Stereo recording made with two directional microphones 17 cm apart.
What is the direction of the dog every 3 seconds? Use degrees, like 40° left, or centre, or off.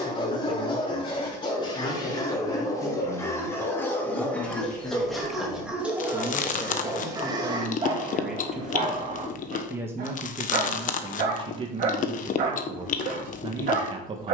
30° left, 10° left, 30° right, 50° right, 60° right.